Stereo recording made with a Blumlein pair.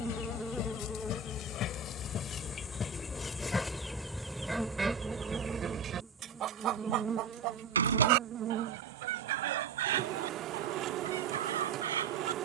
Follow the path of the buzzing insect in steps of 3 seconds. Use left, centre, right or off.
centre, centre, right, right.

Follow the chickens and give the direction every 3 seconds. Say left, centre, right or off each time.
left, centre, right, right.